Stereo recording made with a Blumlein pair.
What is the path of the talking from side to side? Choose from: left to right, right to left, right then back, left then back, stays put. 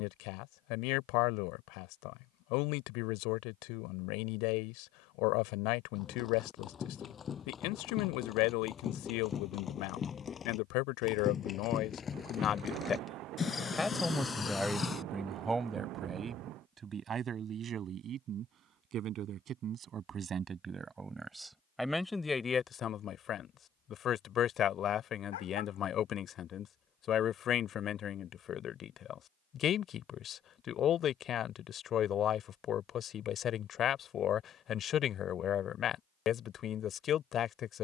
right then back.